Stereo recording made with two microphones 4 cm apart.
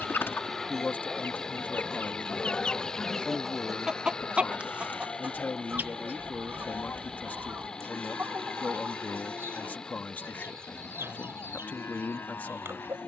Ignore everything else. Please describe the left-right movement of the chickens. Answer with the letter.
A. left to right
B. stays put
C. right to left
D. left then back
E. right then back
A.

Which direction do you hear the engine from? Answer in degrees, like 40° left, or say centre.
20° left.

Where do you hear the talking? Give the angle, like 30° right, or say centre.
40° left.